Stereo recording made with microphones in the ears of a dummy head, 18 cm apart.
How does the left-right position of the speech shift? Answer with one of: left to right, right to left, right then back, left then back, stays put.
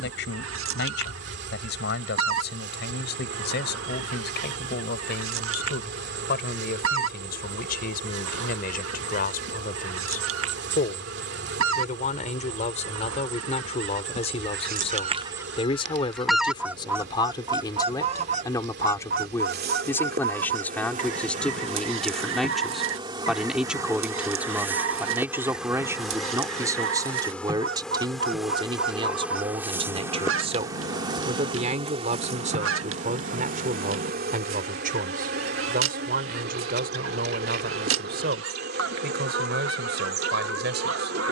left to right.